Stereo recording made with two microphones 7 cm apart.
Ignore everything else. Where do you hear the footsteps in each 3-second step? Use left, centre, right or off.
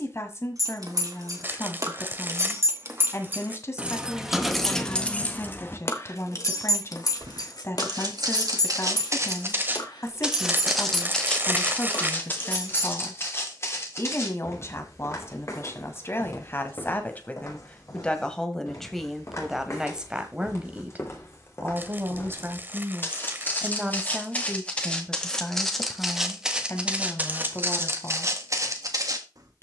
off, off, right, centre, left, left, left, left, centre, right.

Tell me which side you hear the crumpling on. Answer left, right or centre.
right.